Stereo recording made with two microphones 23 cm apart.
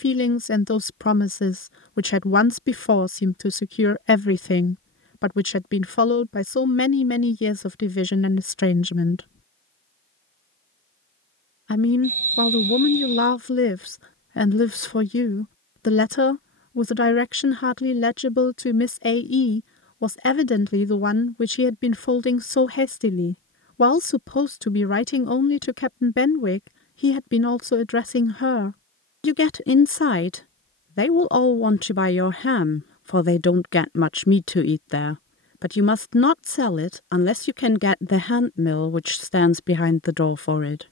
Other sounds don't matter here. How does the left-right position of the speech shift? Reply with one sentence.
You can hear the speech stay put.